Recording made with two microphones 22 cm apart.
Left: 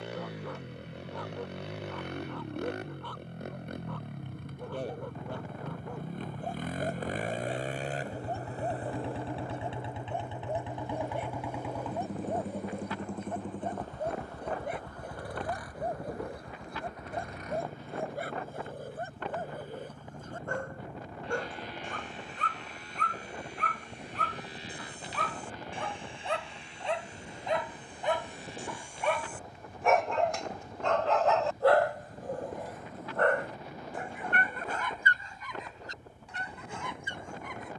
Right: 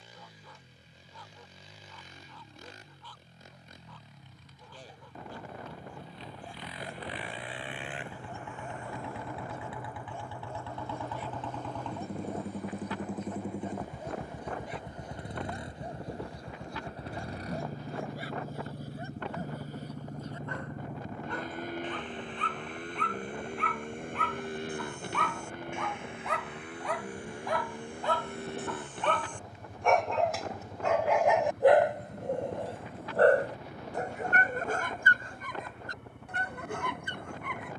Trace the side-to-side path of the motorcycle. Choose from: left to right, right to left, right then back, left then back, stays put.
left to right.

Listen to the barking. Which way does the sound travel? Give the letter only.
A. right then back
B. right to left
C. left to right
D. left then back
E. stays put
C.